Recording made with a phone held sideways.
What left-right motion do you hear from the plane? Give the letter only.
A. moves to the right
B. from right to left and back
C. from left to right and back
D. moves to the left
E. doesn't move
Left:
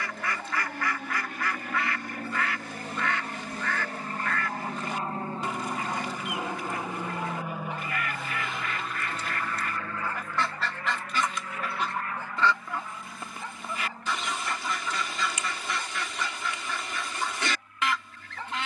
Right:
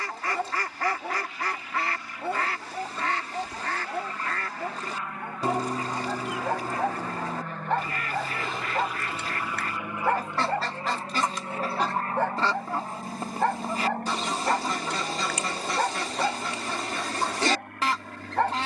A.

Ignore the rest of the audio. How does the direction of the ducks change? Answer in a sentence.
In this clip you hear the ducks stay put.